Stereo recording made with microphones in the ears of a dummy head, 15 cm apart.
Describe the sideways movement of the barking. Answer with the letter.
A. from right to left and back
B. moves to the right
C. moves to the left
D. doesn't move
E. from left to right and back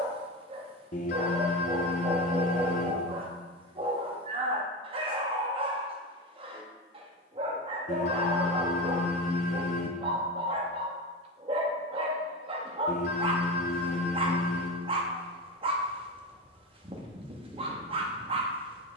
D.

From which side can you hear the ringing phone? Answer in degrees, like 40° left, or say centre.
50° left.